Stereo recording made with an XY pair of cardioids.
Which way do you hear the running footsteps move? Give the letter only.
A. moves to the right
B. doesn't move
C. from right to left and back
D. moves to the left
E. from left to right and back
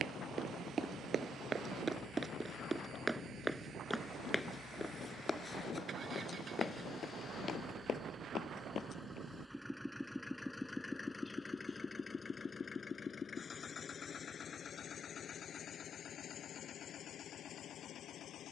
D.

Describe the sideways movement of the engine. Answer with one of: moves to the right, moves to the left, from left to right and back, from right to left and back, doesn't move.
moves to the left.